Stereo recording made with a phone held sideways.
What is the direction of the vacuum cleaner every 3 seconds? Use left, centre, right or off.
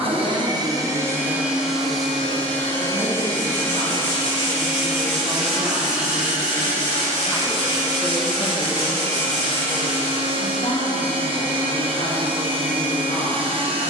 centre, centre, right, right, right.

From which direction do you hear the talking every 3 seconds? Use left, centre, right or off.
right, right, centre, left, left.